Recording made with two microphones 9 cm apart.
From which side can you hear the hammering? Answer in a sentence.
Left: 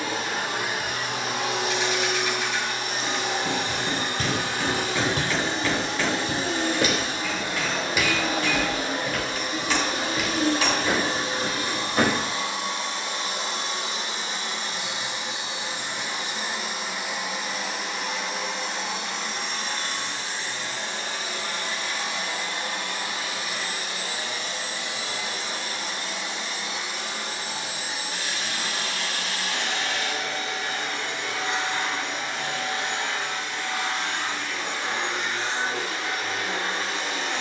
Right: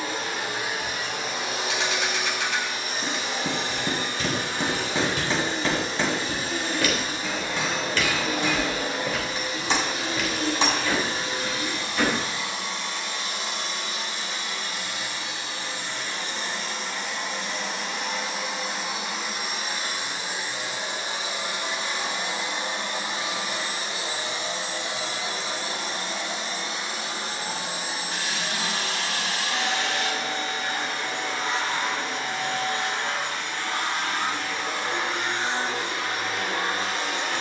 You can hear the hammering on the right.